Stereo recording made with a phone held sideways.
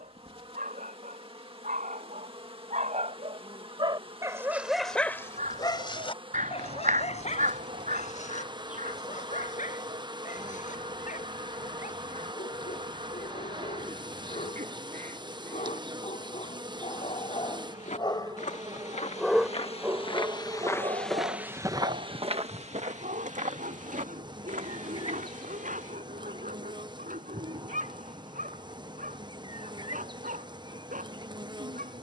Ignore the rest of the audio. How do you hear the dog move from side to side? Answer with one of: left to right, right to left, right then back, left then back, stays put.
left then back.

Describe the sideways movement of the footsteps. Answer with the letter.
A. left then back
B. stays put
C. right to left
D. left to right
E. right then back
D.